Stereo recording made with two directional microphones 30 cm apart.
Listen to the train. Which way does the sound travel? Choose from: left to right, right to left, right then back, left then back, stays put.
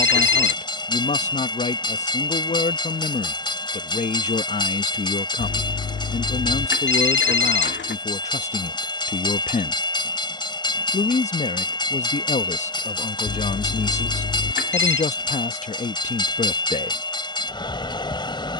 stays put.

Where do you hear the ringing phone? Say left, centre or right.
left.